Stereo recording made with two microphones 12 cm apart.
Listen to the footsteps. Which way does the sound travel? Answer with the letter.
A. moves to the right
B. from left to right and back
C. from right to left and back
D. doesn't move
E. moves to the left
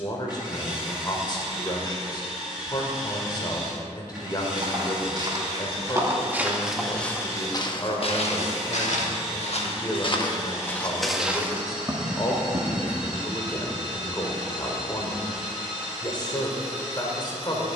C.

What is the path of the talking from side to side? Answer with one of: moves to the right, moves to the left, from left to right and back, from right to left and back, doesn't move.
doesn't move.